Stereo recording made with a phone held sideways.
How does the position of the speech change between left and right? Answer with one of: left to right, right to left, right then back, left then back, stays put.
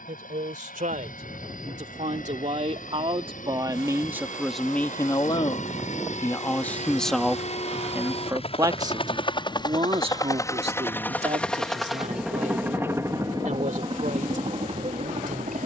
left then back.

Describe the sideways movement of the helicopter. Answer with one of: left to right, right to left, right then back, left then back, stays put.
left to right.